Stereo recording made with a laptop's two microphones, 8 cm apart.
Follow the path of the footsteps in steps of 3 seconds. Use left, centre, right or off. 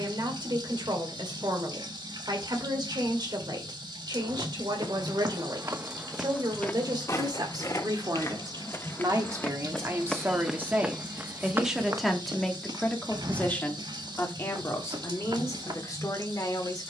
off, right, left, centre, right, right.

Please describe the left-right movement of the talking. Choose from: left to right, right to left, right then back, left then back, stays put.
right to left.